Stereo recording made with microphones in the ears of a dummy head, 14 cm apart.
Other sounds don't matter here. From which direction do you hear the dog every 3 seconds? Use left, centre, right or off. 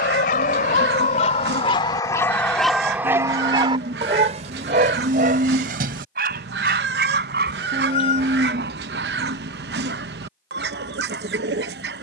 left, right, right, right.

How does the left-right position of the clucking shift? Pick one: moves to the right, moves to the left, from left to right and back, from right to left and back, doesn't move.
doesn't move.